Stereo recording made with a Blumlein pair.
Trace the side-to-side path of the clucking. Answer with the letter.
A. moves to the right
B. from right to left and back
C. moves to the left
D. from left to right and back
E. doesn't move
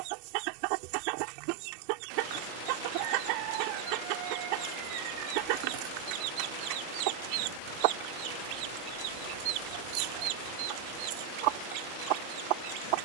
E.